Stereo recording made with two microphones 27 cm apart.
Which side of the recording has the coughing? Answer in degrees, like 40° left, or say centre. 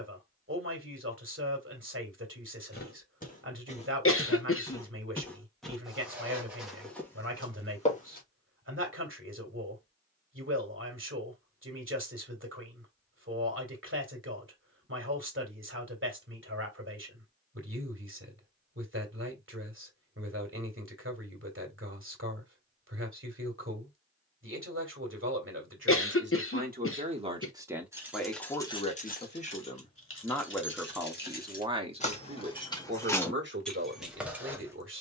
50° left.